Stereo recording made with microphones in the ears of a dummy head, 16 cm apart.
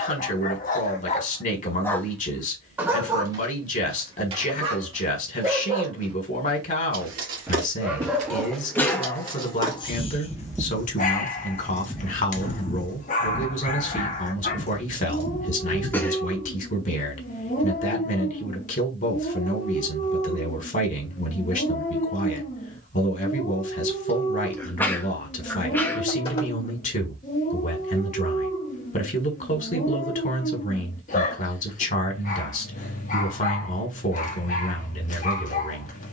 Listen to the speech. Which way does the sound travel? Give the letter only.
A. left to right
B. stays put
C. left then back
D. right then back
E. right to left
B.